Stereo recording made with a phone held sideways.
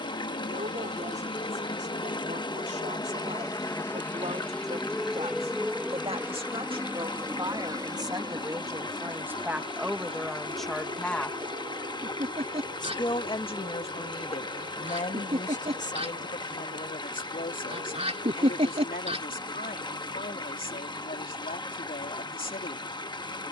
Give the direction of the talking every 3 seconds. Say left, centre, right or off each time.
right, right, right, centre, left, left, left, left.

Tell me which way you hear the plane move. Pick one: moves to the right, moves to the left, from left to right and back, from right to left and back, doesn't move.
moves to the right.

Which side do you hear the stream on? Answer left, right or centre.
left.